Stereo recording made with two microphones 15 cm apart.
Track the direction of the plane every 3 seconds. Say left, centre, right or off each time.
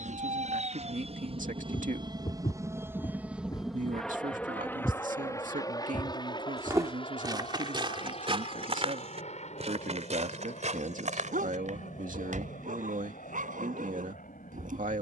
right, centre, left, left, left.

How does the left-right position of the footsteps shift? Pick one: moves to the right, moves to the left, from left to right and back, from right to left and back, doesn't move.
moves to the right.